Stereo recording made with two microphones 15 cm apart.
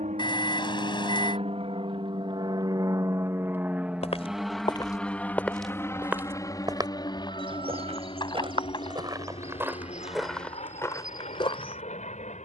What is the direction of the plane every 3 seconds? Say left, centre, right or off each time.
right, centre, left, left.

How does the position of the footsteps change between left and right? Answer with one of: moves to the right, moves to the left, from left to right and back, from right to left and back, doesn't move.
from left to right and back.